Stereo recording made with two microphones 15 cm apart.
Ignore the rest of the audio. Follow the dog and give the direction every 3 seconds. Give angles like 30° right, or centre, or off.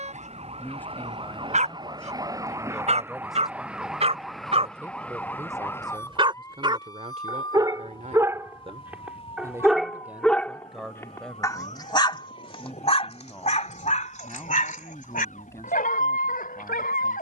50° right, 40° right, 30° right, 10° left, 50° left, 70° left.